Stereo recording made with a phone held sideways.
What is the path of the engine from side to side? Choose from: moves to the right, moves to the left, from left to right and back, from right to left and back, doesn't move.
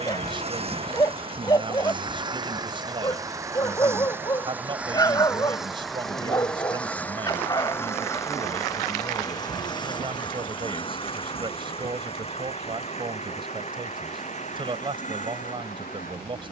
moves to the left.